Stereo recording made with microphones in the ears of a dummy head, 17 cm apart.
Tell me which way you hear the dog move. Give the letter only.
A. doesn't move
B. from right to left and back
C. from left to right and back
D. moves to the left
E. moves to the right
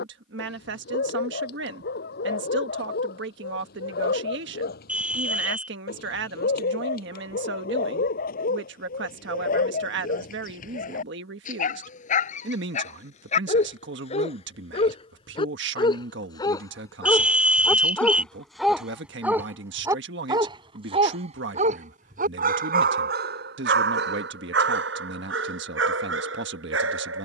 E.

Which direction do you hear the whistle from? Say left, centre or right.
centre.